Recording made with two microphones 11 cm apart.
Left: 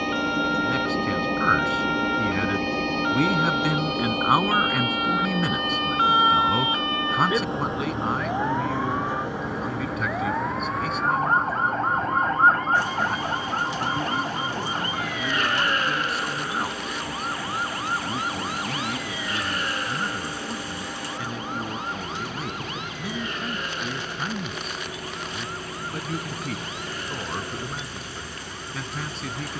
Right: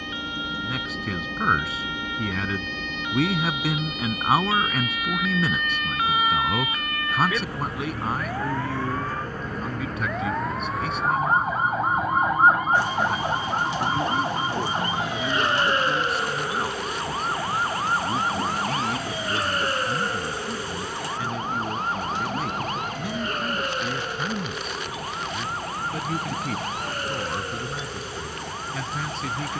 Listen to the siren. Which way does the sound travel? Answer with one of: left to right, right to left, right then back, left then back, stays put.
left to right.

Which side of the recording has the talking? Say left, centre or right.
centre.